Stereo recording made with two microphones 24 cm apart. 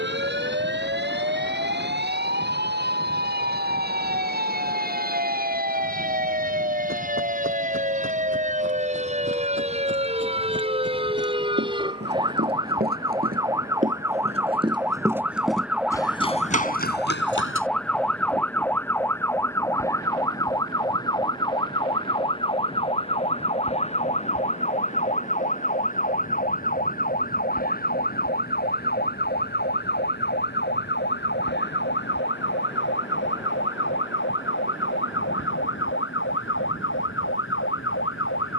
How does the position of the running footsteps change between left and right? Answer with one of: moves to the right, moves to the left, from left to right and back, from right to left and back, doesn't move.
moves to the left.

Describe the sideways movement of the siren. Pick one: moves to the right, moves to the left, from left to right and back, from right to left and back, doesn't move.
moves to the left.